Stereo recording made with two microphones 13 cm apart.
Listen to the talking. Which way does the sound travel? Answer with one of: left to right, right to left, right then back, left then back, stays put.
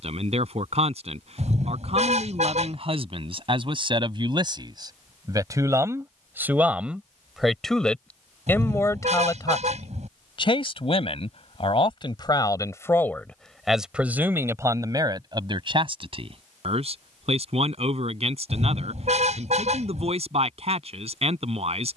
left then back.